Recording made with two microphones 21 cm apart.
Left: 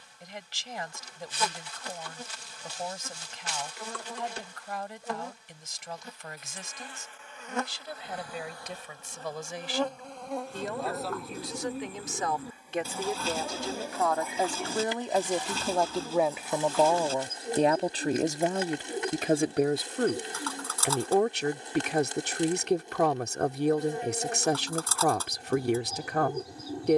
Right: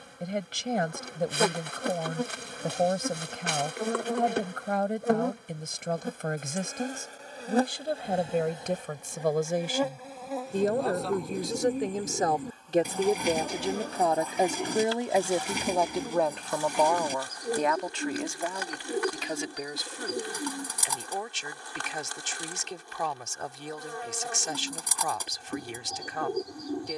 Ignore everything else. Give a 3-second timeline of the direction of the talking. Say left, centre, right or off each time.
right, right, right, right, right, centre, left, left, left.